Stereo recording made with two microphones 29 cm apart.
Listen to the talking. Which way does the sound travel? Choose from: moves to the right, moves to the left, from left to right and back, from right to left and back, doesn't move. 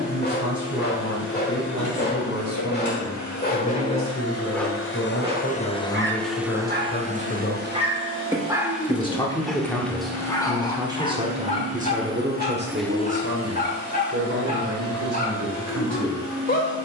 moves to the right.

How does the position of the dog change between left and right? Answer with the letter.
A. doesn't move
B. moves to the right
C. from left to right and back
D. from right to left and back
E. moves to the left
C.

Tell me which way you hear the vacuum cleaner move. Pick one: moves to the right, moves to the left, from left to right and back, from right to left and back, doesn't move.
from left to right and back.